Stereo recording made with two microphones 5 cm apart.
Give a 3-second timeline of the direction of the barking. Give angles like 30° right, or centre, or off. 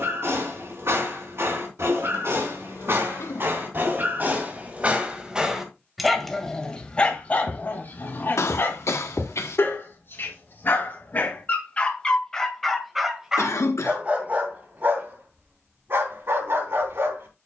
60° right, 40° right, 30° left, 40° left, 10° right, 50° right.